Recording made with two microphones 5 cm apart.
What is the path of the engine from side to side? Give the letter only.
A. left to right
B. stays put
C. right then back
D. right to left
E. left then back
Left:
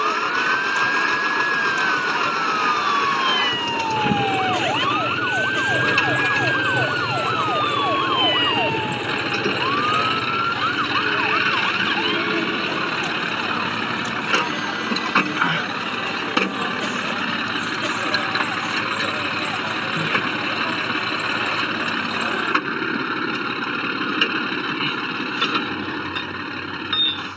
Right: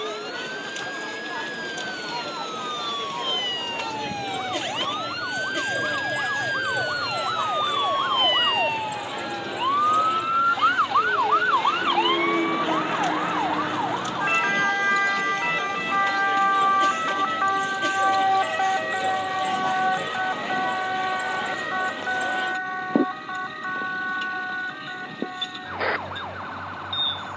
B.